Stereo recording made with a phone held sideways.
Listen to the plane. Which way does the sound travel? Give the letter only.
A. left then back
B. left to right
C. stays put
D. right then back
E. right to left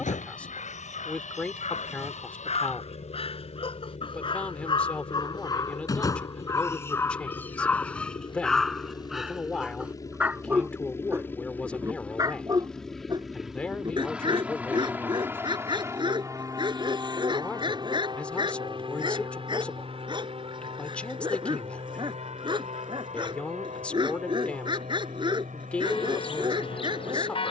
B.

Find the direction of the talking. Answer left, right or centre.
centre.